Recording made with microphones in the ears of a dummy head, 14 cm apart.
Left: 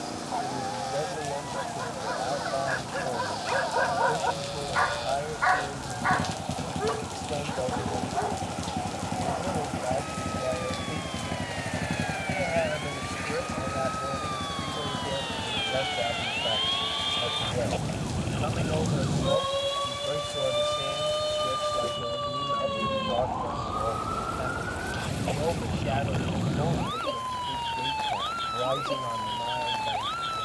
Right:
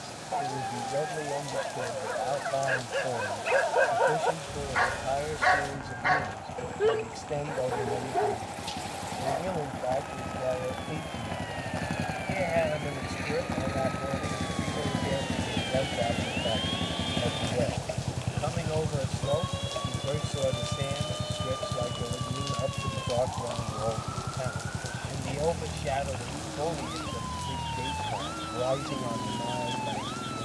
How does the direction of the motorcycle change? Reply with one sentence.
You can hear the motorcycle move to the right.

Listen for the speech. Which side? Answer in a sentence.
You can hear the speech in the centre.